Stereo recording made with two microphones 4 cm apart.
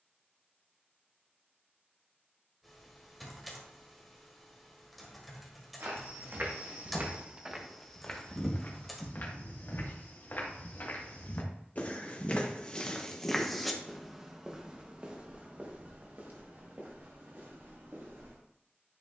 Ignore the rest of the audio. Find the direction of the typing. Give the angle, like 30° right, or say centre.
centre.